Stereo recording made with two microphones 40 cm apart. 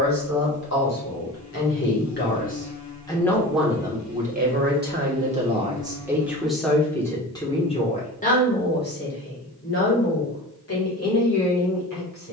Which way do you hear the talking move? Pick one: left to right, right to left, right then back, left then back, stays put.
right then back.